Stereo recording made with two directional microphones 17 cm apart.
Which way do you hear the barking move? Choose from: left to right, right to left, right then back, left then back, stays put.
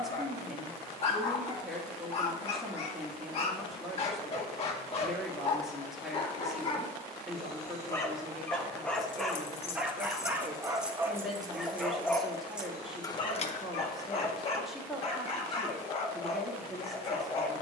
right then back.